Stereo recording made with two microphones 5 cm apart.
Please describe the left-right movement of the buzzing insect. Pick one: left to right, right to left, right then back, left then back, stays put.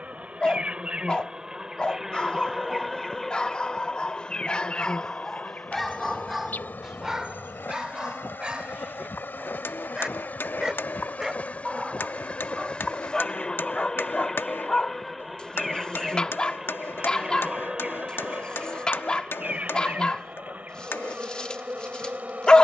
left then back.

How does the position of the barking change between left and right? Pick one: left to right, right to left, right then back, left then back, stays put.
right then back.